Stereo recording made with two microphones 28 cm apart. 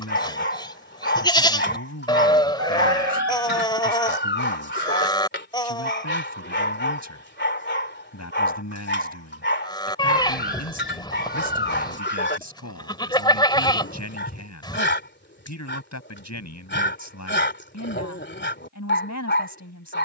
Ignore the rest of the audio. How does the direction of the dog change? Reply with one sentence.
In this clip you hear the dog stay in one place.